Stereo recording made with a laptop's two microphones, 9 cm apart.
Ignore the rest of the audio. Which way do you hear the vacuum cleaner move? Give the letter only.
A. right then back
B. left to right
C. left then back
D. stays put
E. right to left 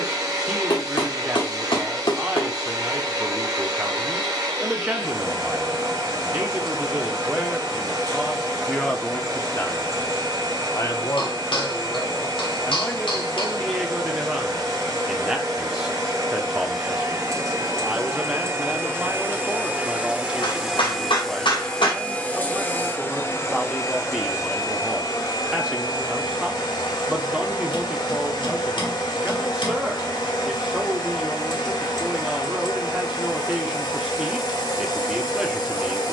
E.